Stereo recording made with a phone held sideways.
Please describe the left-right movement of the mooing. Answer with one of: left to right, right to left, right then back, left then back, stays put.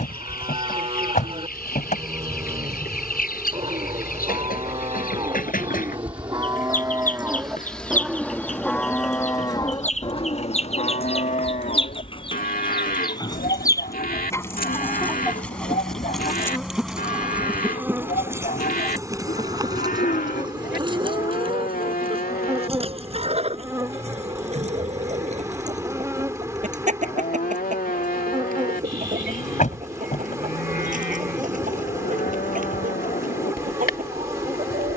right to left.